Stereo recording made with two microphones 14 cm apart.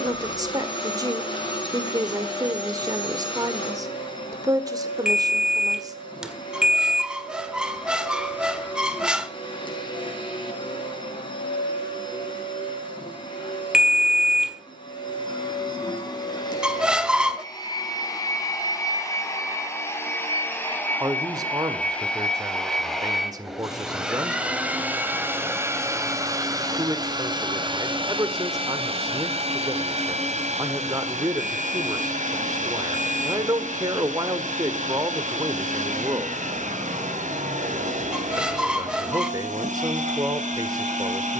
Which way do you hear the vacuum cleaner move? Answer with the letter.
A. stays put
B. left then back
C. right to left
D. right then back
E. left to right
E.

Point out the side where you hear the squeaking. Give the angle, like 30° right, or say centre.
10° right.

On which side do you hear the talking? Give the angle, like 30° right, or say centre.
30° right.